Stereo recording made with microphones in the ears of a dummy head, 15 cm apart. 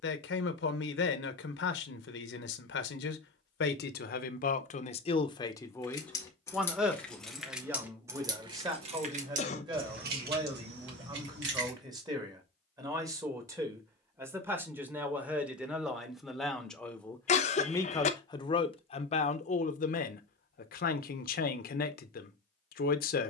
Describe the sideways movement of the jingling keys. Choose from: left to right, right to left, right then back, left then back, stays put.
left to right.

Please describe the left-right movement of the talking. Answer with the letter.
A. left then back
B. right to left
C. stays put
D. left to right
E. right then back
E.